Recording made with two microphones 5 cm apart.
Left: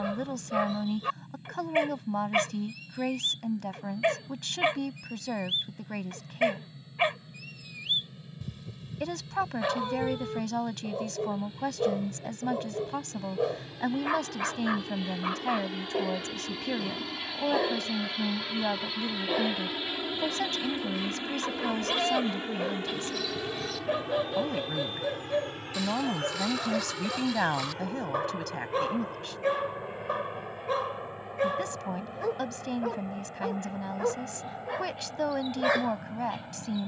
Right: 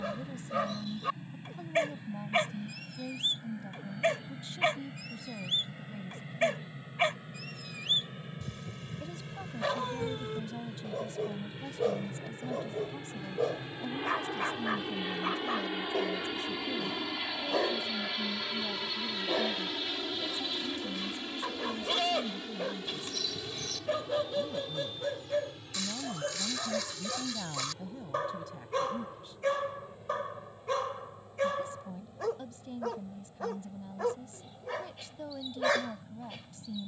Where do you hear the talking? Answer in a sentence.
You can hear the talking on the left.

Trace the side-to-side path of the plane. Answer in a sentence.
In this clip you hear the plane move to the left.